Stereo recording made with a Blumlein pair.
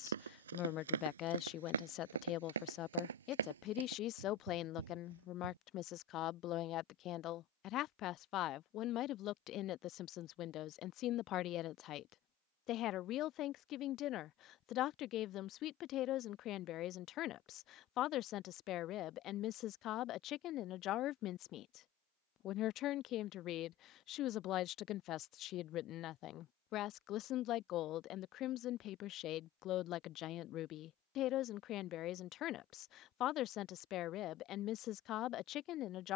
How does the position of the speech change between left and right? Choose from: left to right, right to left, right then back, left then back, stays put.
stays put.